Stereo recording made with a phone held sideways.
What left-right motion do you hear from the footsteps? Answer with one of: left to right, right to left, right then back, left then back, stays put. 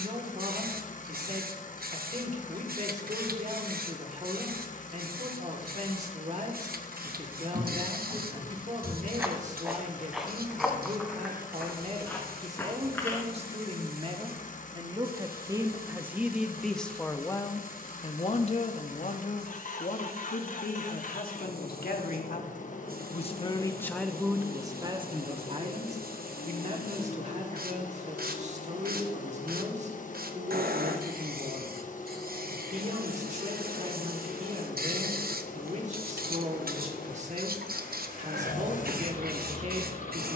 right to left.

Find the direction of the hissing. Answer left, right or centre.
right.